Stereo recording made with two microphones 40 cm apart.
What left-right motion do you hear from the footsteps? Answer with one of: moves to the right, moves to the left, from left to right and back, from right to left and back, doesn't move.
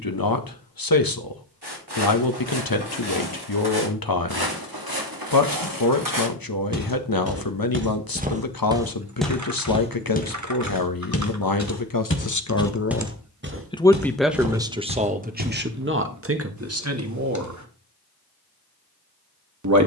from right to left and back.